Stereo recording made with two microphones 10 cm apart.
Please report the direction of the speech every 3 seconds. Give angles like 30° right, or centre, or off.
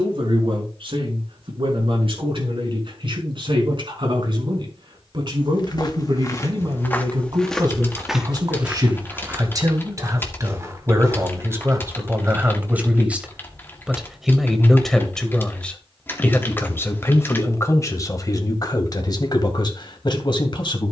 60° right, 50° right, 50° right, 30° right, 10° right, 20° left, 40° left.